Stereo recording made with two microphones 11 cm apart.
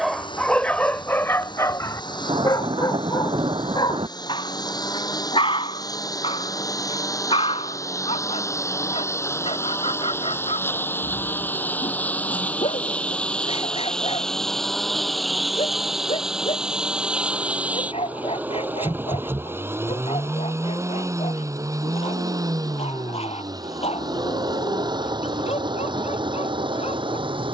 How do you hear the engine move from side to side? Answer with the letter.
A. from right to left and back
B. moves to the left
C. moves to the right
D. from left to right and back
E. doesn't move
C.